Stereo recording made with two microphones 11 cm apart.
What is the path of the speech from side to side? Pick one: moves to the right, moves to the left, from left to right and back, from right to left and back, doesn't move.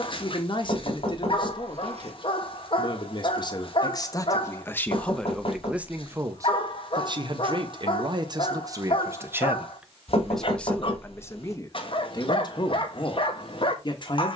from left to right and back.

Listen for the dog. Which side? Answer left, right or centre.
left.